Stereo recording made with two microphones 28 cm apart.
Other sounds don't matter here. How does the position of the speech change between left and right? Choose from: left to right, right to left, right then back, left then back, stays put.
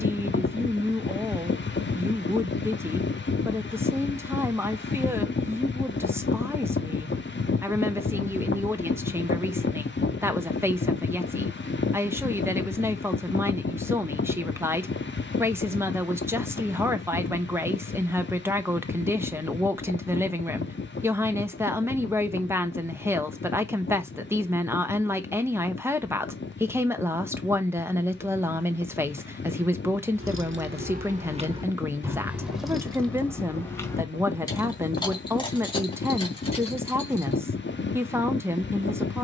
stays put.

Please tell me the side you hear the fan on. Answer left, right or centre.
left.